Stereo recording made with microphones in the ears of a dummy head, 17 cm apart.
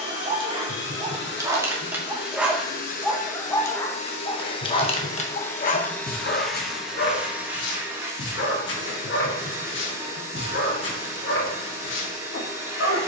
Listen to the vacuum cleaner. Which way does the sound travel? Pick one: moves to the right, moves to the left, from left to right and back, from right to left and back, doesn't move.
moves to the right.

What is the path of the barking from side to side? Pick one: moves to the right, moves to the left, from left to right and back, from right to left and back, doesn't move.
moves to the left.